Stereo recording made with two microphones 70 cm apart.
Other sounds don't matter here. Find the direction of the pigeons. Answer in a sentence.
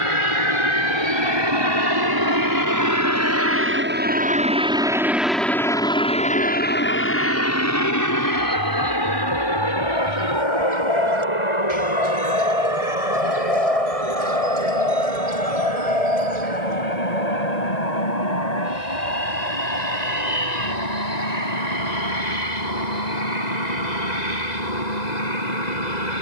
You can hear the pigeons on the right.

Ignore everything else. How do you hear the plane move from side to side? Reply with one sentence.
You can hear the plane move from right to left.